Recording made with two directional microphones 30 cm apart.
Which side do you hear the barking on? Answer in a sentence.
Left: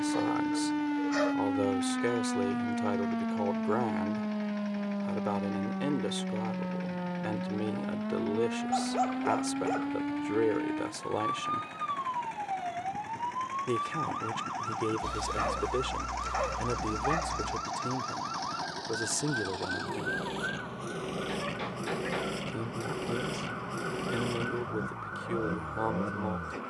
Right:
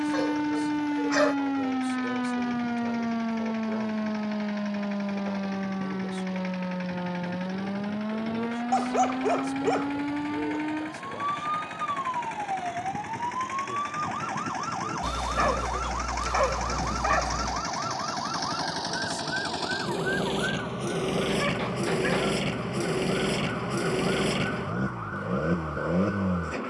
In this clip you hear the barking on the right.